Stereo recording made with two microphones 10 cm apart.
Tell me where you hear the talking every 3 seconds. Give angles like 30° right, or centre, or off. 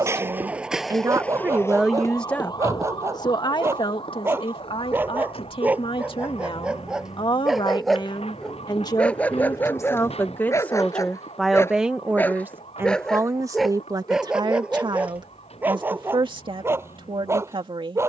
20° right, 60° left, 50° left, 20° left, 30° right, 60° right.